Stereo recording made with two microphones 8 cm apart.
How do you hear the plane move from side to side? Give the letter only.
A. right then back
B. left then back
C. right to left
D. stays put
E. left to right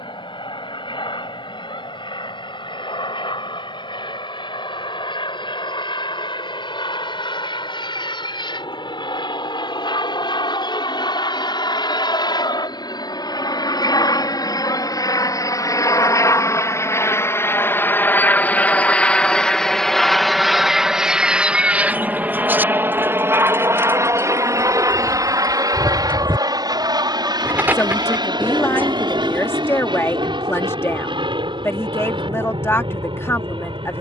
E.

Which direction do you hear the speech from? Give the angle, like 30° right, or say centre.
30° left.